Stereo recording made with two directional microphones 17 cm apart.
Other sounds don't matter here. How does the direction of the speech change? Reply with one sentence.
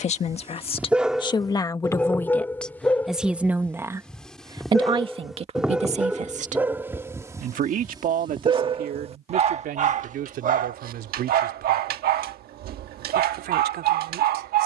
You can hear the speech move from left to right.